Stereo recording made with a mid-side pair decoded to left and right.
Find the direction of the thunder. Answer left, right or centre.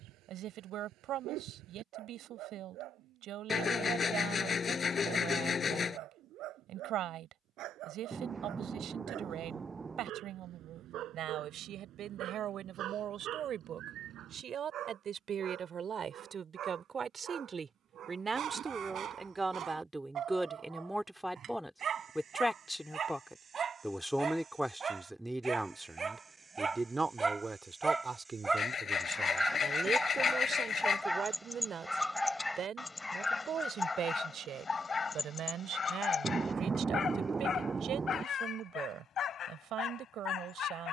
right.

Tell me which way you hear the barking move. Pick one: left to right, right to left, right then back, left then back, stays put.
right to left.